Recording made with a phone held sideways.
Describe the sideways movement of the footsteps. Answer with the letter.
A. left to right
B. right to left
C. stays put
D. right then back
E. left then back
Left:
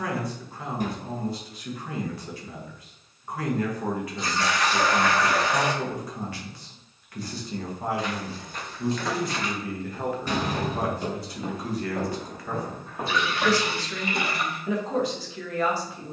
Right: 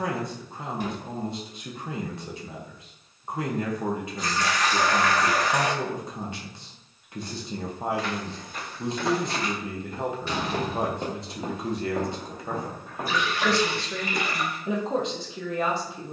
D.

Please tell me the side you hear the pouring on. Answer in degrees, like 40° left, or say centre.
30° left.